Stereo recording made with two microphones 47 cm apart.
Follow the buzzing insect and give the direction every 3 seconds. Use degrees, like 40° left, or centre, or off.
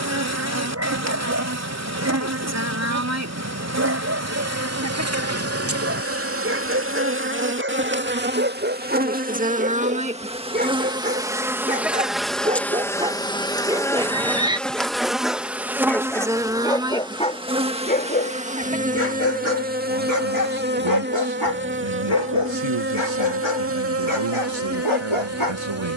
30° right, 30° right, 20° right, 10° right, centre, 10° right, 20° right, 30° right, 30° right.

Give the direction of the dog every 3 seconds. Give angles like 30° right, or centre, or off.
30° right, 30° right, 20° right, 20° right, 10° right, 10° left, 30° left, 60° left, 80° left.